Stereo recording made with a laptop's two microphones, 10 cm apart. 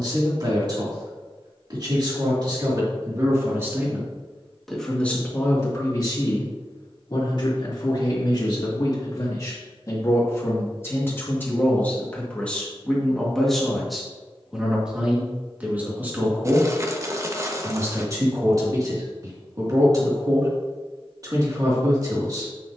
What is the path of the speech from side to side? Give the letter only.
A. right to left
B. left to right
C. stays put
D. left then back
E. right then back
D.